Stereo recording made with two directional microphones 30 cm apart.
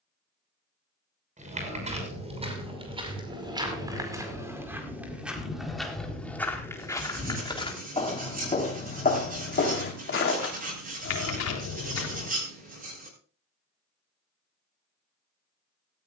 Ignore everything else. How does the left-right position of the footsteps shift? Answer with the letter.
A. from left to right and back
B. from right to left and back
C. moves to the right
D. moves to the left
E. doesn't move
D.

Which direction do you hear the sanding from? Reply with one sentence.
You can hear the sanding on the right.